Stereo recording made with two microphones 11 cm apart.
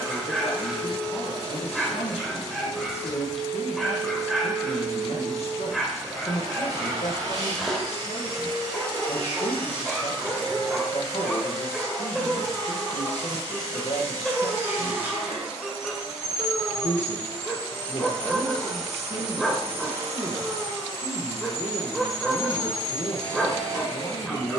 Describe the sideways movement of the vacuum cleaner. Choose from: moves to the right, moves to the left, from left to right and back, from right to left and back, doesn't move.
from right to left and back.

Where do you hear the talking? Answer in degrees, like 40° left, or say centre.
70° left.